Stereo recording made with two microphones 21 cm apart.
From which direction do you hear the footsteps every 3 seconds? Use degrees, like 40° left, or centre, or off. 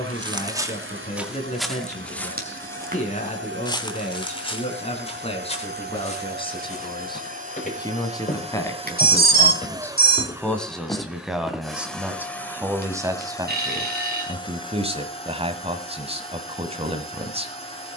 centre, 30° left, 30° left, 20° left, off, off.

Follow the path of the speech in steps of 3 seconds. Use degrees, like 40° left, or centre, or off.
30° left, 30° left, 20° left, centre, 20° right, 30° right.